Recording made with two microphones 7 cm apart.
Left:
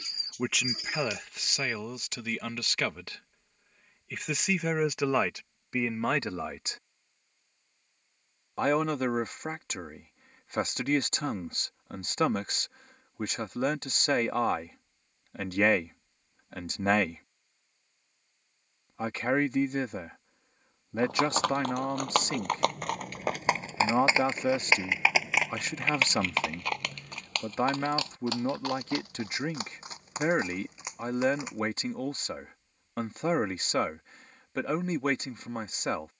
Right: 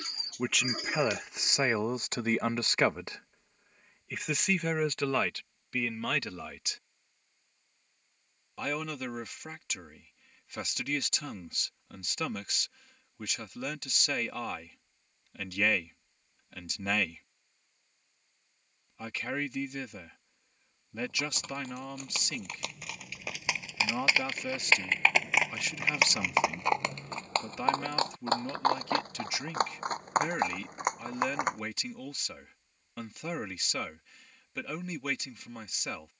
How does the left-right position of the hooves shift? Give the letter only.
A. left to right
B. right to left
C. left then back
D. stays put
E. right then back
A.